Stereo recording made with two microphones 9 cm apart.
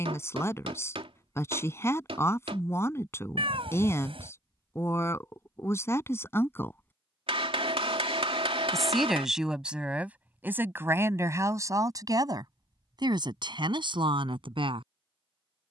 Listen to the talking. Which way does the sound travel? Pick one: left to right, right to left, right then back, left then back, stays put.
left to right.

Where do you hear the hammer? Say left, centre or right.
right.